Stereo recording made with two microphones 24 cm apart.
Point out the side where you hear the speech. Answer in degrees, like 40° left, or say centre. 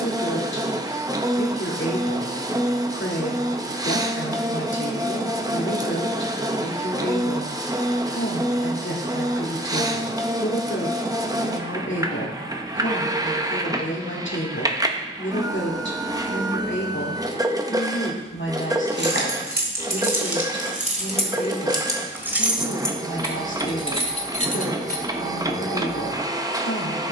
50° left.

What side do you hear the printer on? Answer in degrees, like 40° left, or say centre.
10° right.